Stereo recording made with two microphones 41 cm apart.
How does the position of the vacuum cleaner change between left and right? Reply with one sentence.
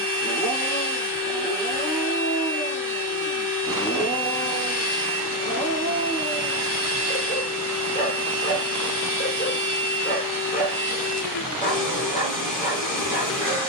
You can hear the vacuum cleaner stay put.